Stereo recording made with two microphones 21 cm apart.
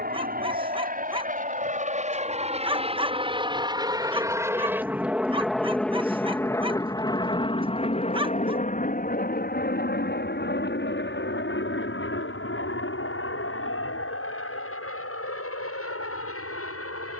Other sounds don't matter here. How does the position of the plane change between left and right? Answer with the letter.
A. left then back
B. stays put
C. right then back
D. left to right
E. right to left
E.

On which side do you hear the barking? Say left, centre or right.
right.